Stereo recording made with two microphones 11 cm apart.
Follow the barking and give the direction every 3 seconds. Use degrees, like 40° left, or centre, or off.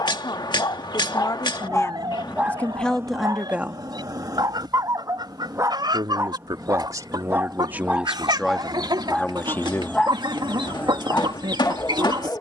10° left, 30° right, 20° right, 10° left.